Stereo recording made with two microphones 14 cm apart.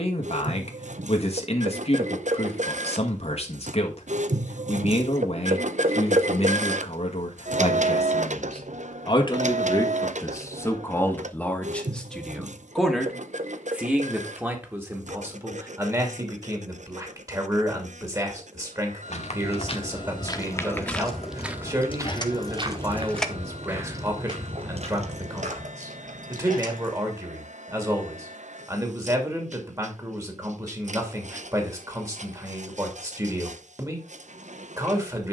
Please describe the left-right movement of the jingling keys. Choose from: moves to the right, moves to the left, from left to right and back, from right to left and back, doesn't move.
moves to the right.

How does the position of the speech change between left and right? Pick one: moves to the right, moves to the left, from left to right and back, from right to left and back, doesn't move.
moves to the right.